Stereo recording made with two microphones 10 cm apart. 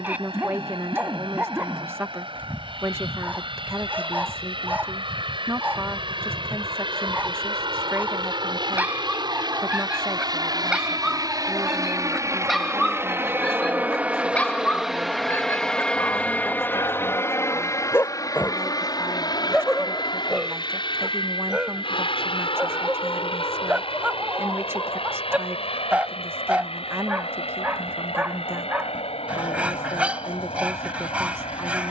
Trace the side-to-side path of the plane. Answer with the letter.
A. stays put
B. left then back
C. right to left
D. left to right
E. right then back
C.